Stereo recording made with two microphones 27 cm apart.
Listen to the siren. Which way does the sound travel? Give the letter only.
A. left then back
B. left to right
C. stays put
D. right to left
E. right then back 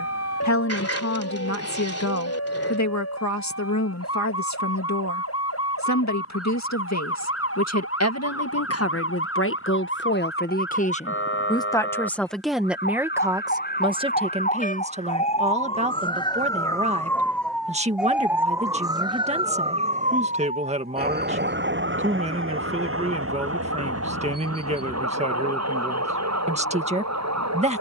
B.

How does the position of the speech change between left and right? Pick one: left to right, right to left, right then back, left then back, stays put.
left to right.